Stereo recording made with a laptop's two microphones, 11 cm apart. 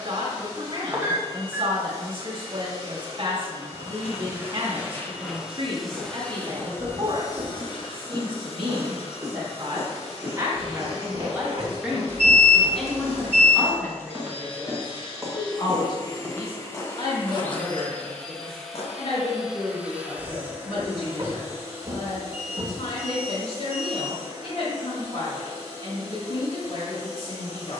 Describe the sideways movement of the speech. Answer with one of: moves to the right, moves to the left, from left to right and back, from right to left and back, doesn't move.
moves to the left.